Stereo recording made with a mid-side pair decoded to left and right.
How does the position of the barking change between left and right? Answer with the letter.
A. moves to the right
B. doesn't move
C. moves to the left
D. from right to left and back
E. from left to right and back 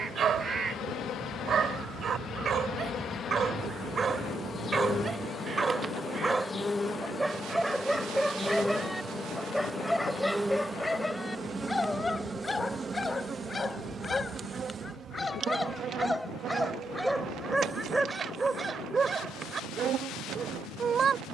D.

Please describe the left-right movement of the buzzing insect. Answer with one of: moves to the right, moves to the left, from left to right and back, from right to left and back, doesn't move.
moves to the right.